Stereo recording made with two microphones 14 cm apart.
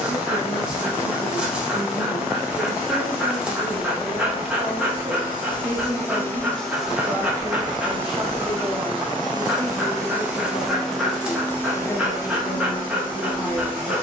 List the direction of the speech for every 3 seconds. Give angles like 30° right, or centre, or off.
30° left, 10° left, 10° right, 20° left, 30° left.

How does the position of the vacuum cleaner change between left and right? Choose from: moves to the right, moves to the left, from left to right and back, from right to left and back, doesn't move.
from left to right and back.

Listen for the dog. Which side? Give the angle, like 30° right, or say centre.
10° right.